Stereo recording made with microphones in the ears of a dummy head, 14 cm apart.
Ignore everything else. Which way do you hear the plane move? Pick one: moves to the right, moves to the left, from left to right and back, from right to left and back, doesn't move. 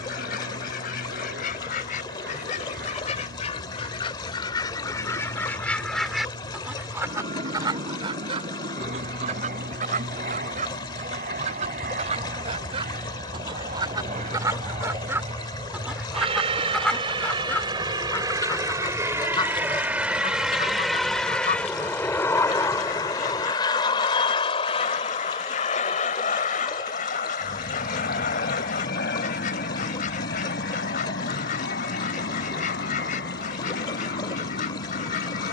moves to the left.